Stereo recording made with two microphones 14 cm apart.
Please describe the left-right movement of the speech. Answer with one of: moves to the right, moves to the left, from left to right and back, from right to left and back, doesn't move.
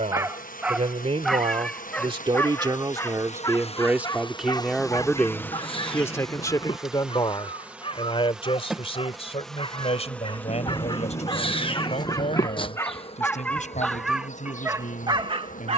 moves to the left.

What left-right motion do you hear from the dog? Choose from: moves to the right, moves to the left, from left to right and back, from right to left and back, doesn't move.
from right to left and back.